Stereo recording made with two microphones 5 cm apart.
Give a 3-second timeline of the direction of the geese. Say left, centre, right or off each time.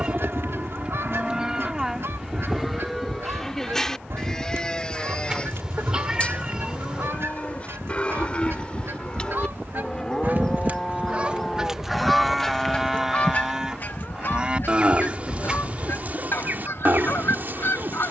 right, right, right, right, left, left.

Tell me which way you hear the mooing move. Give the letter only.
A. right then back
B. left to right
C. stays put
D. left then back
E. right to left
D.